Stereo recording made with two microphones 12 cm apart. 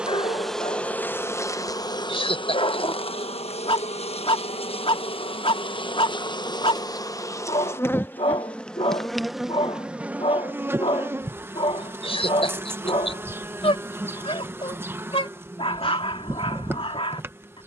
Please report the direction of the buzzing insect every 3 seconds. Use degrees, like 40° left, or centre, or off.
20° left, 50° left, 20° left, 10° right, 20° right, 20° right.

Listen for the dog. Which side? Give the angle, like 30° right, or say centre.
50° left.